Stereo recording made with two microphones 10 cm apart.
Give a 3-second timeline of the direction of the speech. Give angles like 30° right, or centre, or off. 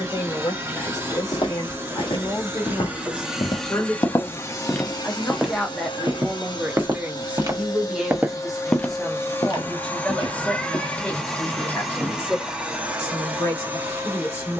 30° left, 20° left, 10° right, 20° left, 30° left.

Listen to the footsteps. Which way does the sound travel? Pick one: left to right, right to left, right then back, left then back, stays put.
right then back.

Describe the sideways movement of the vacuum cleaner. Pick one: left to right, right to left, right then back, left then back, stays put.
left then back.